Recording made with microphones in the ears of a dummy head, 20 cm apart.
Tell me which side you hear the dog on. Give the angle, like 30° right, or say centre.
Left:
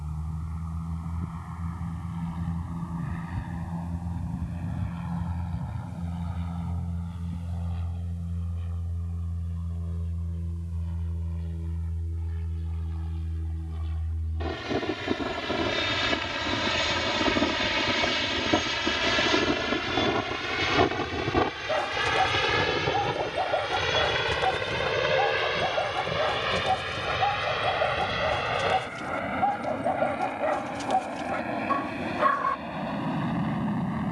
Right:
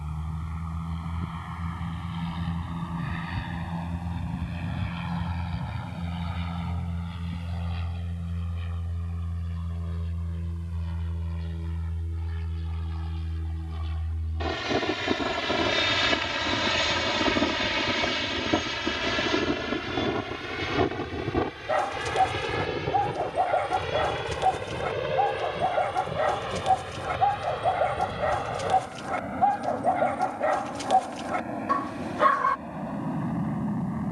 10° right.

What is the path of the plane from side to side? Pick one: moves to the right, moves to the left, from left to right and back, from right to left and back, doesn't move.
moves to the left.